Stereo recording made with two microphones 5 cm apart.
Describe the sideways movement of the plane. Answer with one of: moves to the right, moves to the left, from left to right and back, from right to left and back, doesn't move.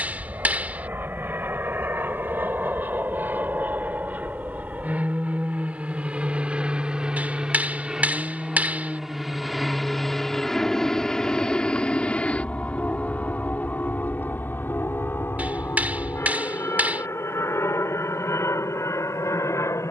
moves to the left.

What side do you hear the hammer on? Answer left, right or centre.
right.